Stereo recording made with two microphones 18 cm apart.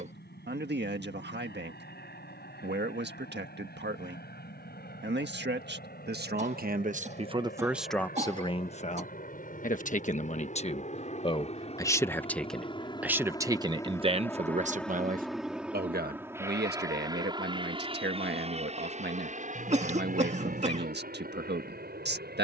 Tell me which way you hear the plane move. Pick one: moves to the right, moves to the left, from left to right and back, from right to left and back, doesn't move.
moves to the right.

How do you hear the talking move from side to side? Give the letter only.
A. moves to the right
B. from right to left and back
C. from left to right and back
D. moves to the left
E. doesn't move
B.